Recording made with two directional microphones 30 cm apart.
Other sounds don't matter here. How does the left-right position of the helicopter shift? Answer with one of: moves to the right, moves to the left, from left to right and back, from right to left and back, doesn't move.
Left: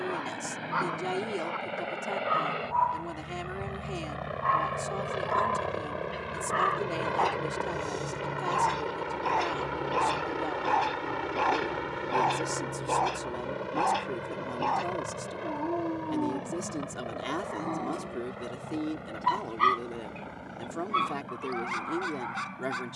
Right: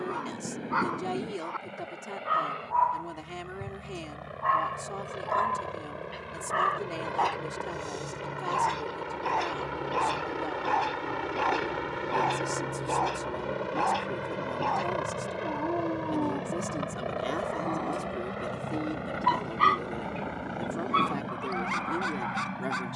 moves to the right.